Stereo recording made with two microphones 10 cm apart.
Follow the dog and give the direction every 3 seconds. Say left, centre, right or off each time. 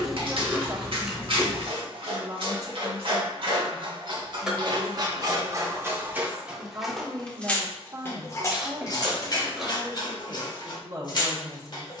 right, right, centre, left.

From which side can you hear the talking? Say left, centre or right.
right.